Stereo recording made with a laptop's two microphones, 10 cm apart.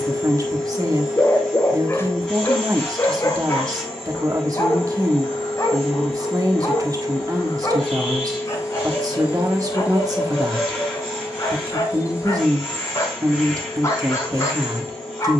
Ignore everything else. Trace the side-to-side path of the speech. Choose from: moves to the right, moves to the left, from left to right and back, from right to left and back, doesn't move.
doesn't move.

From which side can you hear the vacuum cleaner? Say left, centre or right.
centre.